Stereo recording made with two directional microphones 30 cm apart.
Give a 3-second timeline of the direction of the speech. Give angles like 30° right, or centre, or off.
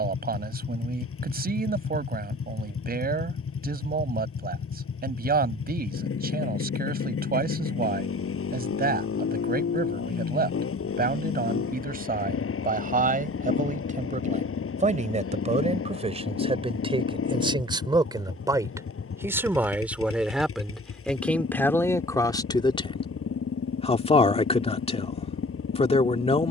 30° right, 30° right, 30° right, 30° right, 30° right, 20° right, 10° right, 10° left, 20° left.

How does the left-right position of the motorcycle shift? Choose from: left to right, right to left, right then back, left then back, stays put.
stays put.